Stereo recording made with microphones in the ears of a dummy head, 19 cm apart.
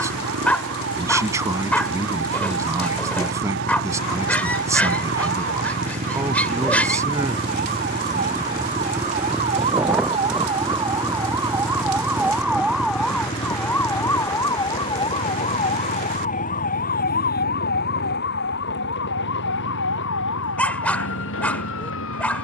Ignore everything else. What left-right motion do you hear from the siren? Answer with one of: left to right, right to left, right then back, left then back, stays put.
right to left.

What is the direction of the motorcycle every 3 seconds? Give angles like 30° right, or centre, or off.
60° right, 40° right, 30° right, centre, 30° left, 40° left, 50° left, 60° left.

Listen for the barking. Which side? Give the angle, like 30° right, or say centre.
10° left.